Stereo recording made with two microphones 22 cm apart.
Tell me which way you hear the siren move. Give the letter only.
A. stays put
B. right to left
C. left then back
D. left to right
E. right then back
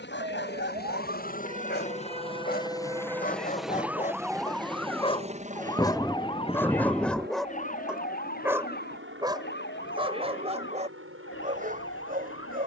B.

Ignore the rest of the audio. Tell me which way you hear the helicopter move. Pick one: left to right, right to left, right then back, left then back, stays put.
left to right.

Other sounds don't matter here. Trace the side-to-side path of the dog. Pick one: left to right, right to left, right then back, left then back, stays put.
left to right.